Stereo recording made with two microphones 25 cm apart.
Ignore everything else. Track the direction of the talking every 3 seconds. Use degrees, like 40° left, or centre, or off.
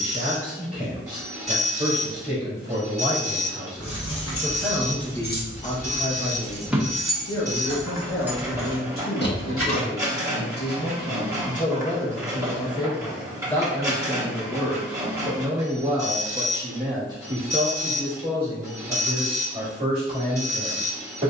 30° right, centre, 60° left, 40° left, 10° left, 10° right, 30° right.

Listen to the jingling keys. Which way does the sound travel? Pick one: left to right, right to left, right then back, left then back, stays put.
right then back.